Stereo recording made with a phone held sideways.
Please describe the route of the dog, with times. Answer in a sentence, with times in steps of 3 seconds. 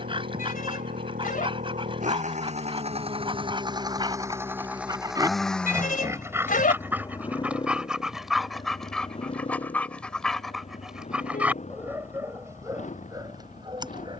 In this clip you hear the dog on the right from 0 s, in the centre from 6 s and on the right from 12 s.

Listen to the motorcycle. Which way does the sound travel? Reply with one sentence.
In this clip you hear the motorcycle move from right to left.